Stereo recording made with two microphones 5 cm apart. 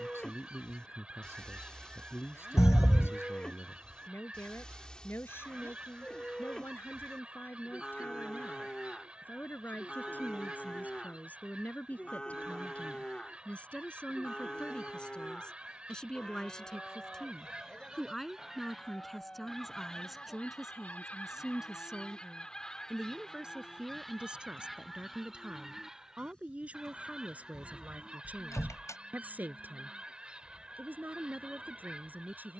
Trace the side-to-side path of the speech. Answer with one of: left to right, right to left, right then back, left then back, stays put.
left to right.